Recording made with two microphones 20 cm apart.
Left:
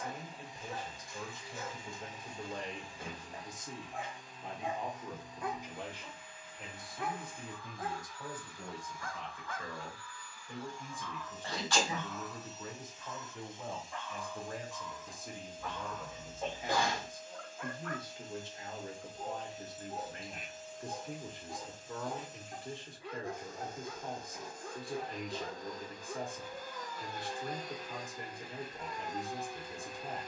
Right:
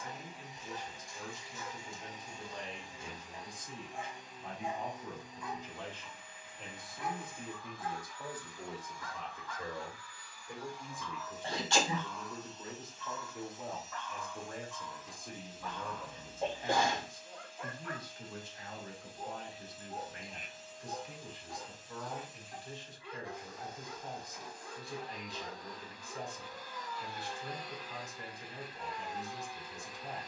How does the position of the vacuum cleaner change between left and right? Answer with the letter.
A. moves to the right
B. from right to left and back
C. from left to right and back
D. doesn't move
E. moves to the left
E.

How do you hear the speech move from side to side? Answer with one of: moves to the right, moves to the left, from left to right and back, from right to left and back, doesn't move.
from left to right and back.